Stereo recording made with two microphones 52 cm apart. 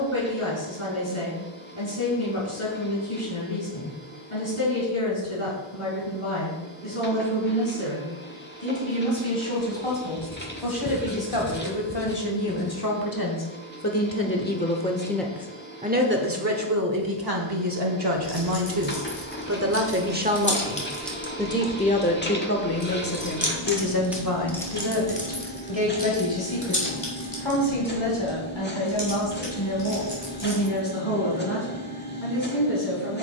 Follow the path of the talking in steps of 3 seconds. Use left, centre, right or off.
left, left, left, left, left, right, right, left, left, left, left.